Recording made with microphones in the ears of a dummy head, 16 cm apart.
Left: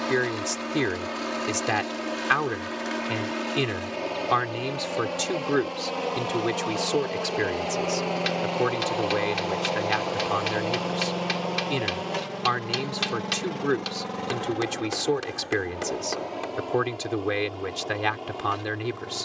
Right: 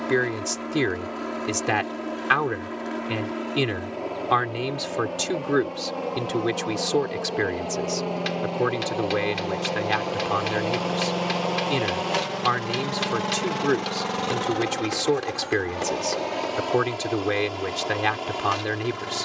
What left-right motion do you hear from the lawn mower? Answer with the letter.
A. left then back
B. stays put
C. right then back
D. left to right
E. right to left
D.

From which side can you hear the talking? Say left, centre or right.
centre.